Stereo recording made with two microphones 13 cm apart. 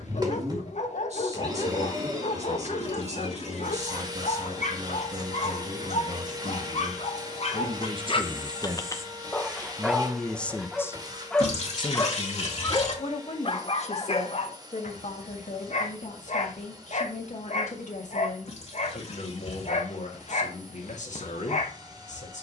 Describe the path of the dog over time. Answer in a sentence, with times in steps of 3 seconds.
You can hear the dog on the left from 0 s, in the centre from 9 s and on the left from 12 s.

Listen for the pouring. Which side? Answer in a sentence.
In this clip you hear the pouring on the left.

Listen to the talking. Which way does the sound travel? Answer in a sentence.
You can hear the talking move to the left.